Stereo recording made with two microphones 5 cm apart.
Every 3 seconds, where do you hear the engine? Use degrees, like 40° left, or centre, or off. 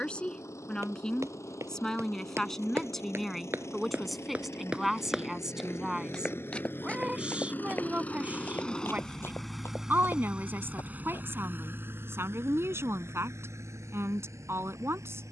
70° left, 60° left, 30° left, 20° right, 60° right.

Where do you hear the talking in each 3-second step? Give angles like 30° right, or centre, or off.
10° left, centre, 20° right, 40° right, 50° right.